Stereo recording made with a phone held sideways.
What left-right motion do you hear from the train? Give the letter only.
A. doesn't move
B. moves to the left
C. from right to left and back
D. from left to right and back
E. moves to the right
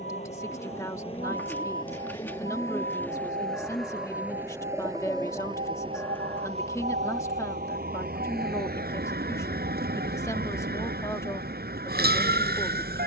E.